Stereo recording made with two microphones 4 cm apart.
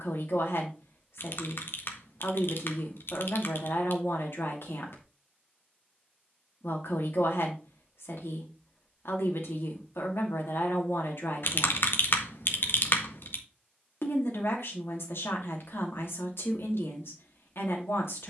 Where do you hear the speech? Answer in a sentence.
You can hear the speech on the left.